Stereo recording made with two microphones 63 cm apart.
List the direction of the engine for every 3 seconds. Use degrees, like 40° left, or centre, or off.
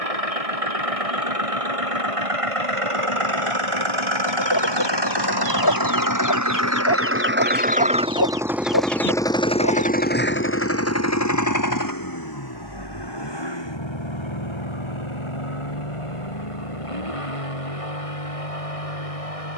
60° right, 40° right, 10° right, 20° left, 40° left, 50° left, 60° left.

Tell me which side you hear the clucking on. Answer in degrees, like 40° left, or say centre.
30° left.